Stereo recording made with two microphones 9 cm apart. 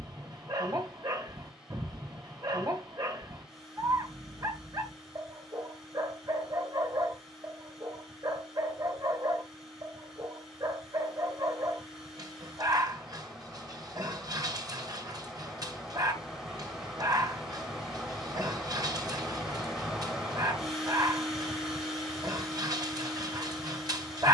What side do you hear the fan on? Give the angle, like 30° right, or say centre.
centre.